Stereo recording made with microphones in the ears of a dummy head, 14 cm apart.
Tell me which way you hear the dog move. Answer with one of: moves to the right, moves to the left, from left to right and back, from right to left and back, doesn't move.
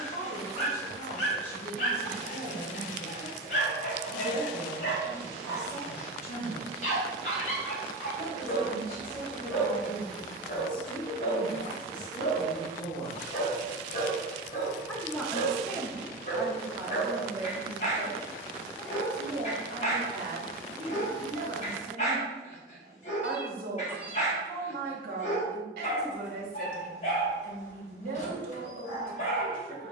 doesn't move.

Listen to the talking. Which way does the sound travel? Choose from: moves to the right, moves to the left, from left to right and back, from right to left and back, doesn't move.
moves to the right.